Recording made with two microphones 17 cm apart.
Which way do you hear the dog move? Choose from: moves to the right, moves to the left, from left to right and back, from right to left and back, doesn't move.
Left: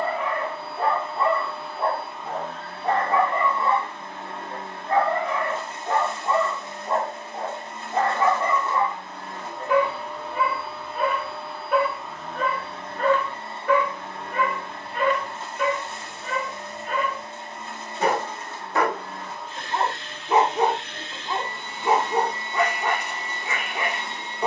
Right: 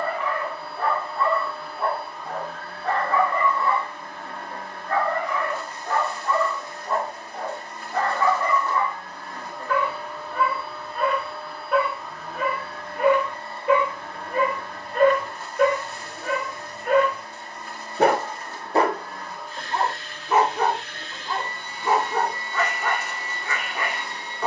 from left to right and back.